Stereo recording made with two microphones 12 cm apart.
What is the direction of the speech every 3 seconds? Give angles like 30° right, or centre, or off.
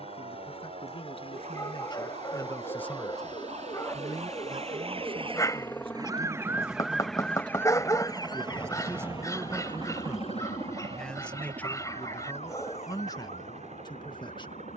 40° left, 30° right, 40° right, centre, 30° left.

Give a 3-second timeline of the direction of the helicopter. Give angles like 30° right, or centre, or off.
50° left, 30° left, 10° right, 50° right, 60° right.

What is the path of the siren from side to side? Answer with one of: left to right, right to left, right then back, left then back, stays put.
right to left.